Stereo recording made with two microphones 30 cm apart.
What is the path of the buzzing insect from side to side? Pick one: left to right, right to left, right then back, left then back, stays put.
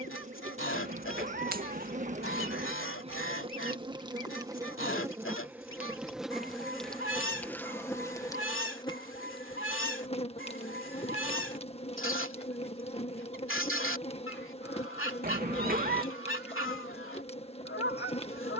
right to left.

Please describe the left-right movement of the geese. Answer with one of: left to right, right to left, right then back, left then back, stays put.
stays put.